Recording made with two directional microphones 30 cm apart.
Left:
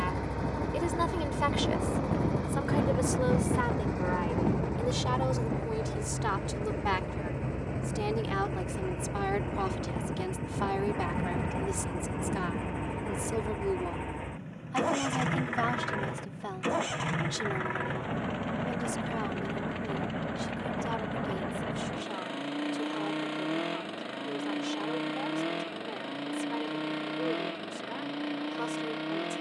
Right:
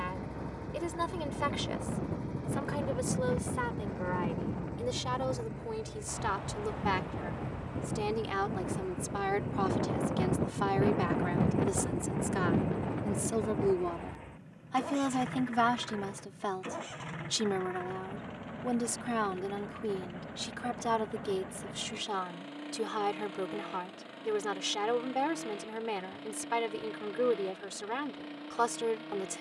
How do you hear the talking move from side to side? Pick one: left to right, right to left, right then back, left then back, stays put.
left to right.